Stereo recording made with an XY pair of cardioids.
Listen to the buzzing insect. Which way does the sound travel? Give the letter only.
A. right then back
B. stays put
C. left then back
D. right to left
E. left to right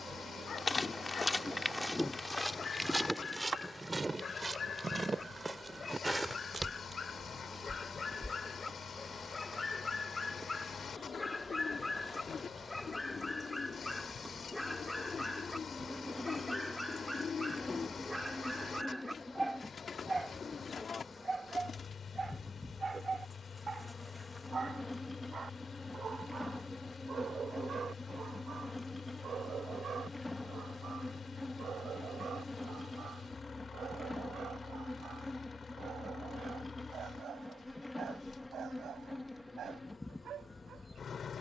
D.